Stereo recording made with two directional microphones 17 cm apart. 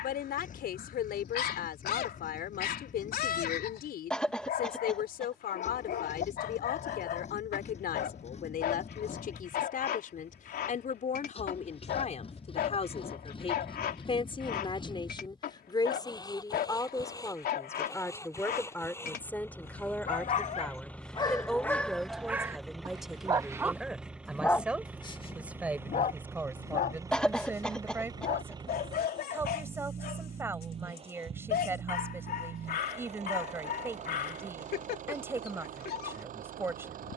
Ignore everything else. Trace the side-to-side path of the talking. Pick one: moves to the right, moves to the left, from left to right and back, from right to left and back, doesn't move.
moves to the right.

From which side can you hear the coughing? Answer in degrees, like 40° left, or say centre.
centre.